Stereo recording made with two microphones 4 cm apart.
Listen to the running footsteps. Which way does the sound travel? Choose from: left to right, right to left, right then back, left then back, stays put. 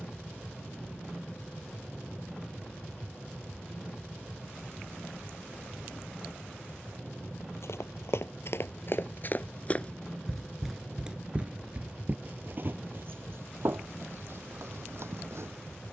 left to right.